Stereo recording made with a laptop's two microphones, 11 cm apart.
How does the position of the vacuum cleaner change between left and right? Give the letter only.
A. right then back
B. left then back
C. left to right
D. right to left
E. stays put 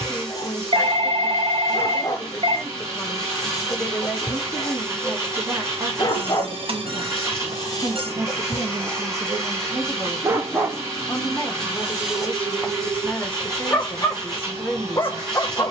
E.